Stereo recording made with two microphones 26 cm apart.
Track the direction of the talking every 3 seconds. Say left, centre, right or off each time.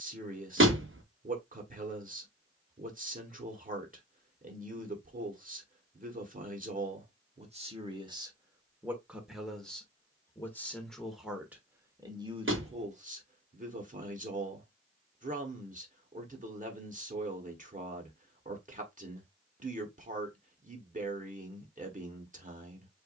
right, right, right, centre, right, right, right, right.